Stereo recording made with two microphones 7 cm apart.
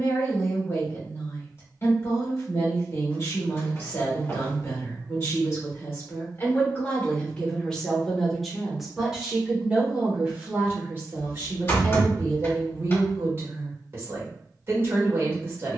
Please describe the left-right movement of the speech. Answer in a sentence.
You can hear the speech move from left to right.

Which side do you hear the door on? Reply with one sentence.
You can hear the door on the left.